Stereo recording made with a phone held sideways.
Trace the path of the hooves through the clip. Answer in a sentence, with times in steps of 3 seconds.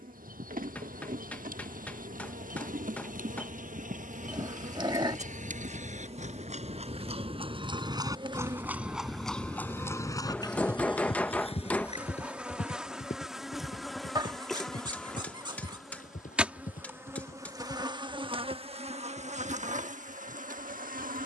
You can hear the hooves on the right from 0 s, on the left from 9 s and not at all from 18 s.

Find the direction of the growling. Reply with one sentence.
You can hear the growling on the right.